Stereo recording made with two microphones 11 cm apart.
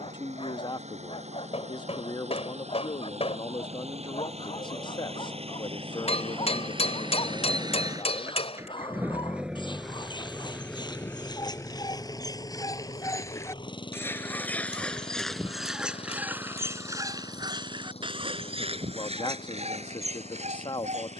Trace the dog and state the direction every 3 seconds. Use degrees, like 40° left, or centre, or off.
60° left, 50° left, 50° left, 40° left, 20° left, 20° right, 70° right.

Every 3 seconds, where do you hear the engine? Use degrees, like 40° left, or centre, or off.
80° right, 70° right, 40° right, 10° left, 40° left, 50° left, 60° left.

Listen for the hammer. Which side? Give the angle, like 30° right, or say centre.
60° left.